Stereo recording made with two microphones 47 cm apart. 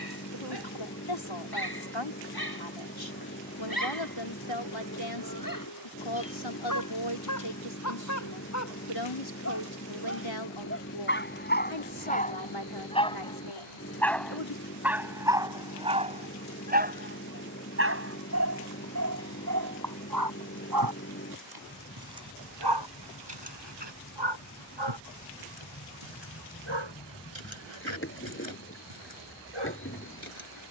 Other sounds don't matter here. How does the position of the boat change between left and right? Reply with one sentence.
You can hear the boat stay put.